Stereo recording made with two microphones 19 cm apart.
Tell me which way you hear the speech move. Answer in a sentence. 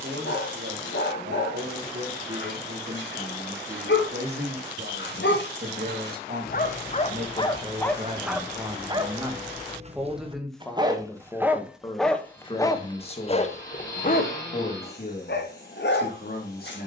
You can hear the speech go from the right side to the left.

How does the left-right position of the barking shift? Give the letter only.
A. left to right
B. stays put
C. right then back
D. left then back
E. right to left
C.